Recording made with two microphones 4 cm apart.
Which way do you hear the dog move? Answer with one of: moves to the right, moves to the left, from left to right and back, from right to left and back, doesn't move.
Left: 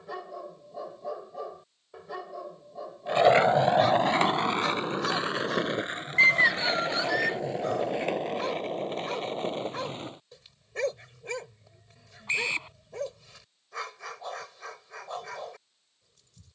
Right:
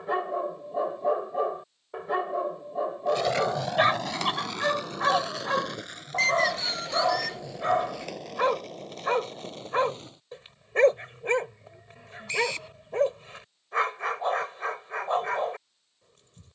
doesn't move.